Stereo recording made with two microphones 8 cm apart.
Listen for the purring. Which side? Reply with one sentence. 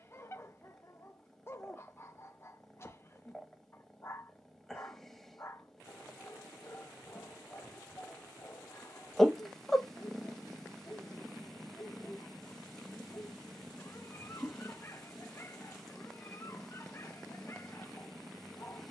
You can hear the purring in the centre.